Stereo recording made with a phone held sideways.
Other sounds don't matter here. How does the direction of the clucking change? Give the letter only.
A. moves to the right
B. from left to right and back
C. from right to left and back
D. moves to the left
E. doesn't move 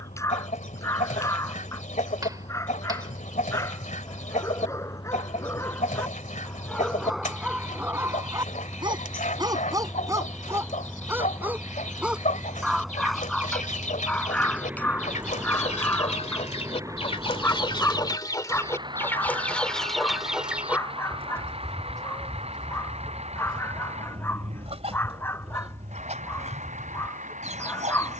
A.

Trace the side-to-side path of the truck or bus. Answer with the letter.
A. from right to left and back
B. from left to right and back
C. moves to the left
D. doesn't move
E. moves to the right
E.